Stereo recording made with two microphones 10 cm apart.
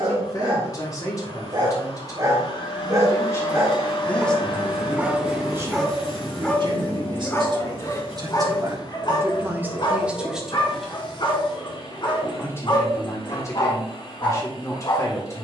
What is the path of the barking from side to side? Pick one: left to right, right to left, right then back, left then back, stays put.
right to left.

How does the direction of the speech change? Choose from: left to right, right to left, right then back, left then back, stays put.
right then back.